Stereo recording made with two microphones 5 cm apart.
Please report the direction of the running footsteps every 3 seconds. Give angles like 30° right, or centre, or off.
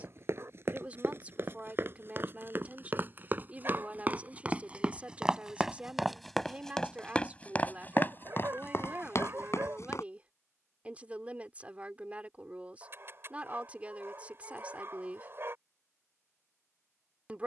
40° right, 20° right, 30° left, 60° left, off, off.